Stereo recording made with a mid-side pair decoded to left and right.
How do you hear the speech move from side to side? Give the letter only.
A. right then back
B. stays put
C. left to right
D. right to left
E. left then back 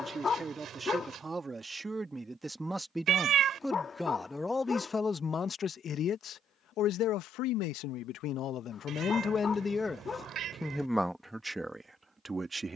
E.